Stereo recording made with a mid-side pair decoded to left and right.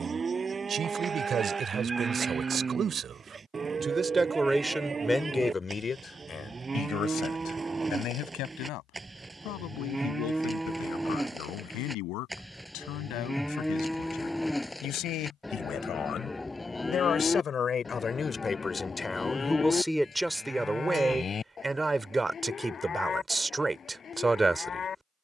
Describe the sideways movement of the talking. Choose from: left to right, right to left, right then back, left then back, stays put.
left then back.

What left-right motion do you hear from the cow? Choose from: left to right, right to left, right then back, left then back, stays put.
right to left.